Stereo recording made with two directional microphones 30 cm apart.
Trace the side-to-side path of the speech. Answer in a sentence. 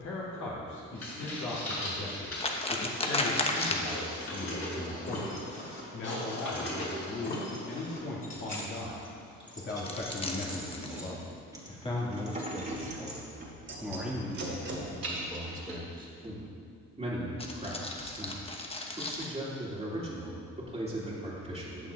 You can hear the speech move from left to right.